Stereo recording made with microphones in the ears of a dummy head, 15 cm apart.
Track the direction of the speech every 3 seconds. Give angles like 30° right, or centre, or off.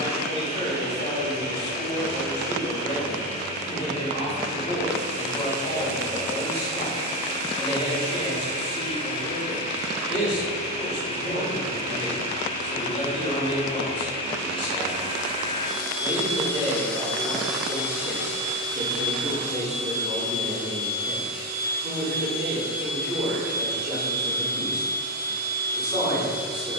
30° left, 30° left, 30° left, 30° left, 30° left, 20° left, centre, 10° right, 10° right.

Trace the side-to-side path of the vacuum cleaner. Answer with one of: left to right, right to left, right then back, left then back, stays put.
left to right.